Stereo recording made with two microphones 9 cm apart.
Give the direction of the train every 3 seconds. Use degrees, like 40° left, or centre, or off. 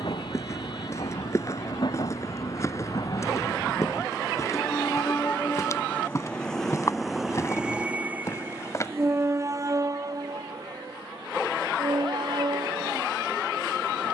60° left, 30° left, 10° right, 40° right, 60° right.